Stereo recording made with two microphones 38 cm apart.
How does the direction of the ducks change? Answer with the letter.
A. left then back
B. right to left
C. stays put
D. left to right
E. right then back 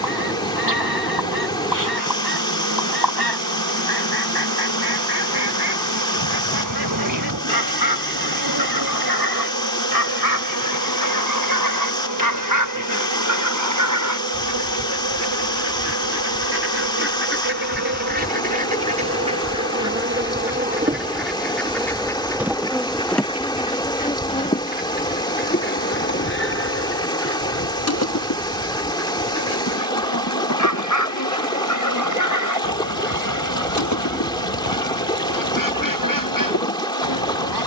B.